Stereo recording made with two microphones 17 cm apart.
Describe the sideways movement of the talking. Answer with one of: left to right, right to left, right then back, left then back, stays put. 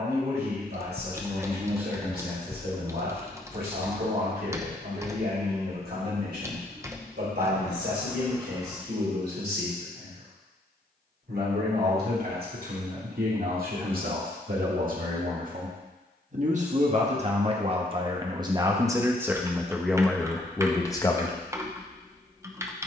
right to left.